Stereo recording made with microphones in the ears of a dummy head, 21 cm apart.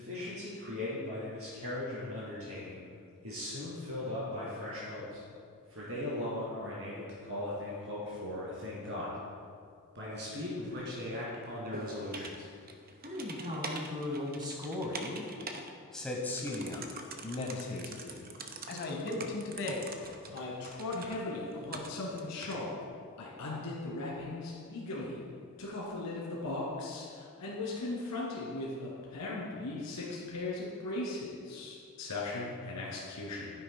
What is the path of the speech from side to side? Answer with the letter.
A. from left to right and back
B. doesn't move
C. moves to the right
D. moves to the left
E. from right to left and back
D.